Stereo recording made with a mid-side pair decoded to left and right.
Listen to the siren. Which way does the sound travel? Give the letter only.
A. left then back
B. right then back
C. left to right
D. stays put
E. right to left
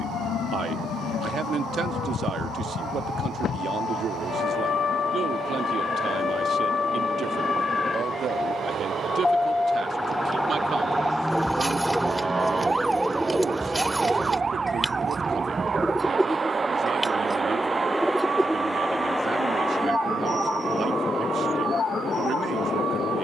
C.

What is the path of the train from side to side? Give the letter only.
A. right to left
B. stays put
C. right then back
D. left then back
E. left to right
A.